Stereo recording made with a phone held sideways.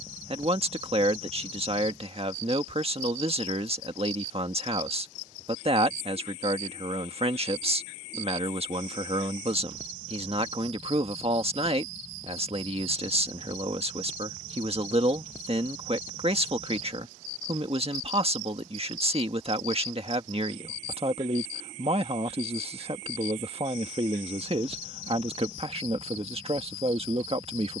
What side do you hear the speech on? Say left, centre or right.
right.